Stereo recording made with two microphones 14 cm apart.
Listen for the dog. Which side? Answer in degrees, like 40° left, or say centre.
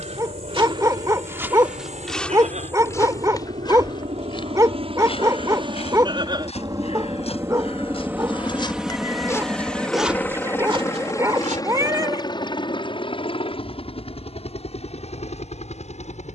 20° right.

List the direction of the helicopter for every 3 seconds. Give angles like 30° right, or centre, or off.
60° right, 50° right, 20° right, 10° left, 40° left, 50° left.